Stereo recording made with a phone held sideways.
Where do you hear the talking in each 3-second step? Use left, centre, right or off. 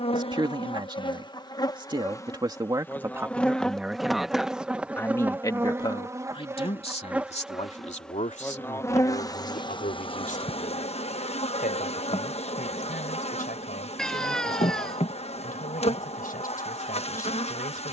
right, centre, left, left, left, left.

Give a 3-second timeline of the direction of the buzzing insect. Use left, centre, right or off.
left, centre, centre, left, left, left.